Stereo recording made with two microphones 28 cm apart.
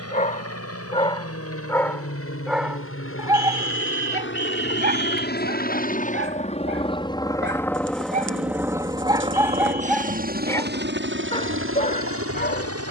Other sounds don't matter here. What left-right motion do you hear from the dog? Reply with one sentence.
In this clip you hear the dog go right and come back.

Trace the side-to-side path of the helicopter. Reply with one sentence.
In this clip you hear the helicopter go from the left side to the right.